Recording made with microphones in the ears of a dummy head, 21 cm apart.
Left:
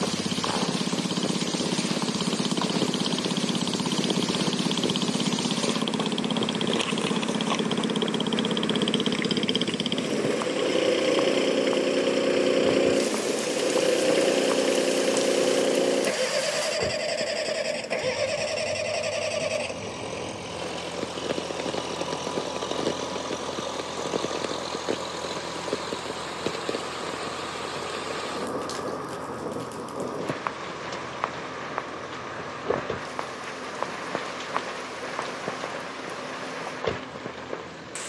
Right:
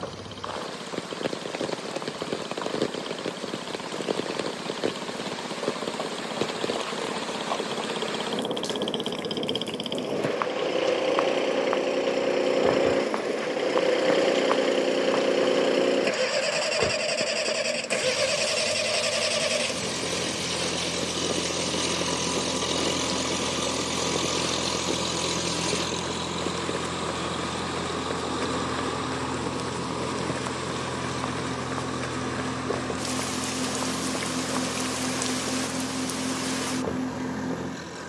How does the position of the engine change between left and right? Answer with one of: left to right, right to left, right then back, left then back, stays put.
left to right.